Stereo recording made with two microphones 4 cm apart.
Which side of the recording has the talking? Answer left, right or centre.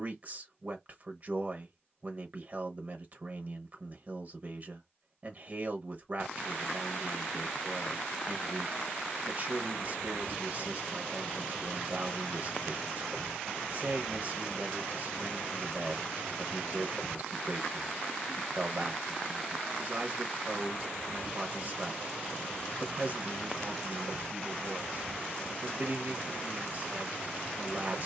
right.